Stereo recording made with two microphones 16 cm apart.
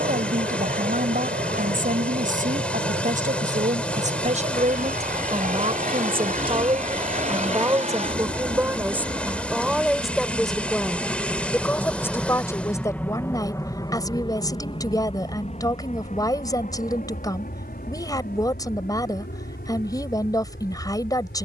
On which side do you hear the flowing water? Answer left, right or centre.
centre.